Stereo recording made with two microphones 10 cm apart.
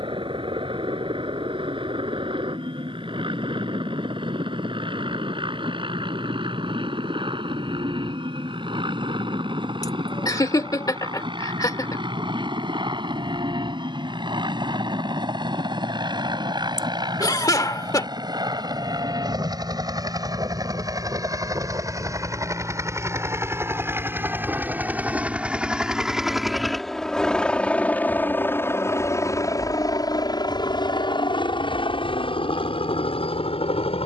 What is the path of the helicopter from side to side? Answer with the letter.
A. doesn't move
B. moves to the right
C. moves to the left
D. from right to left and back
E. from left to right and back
C.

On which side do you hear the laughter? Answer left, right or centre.
left.